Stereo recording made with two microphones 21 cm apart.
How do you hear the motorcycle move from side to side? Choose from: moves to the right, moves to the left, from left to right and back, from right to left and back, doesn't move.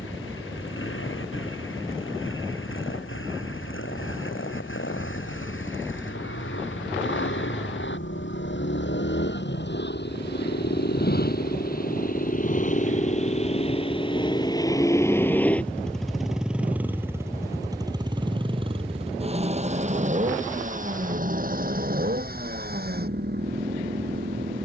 moves to the right.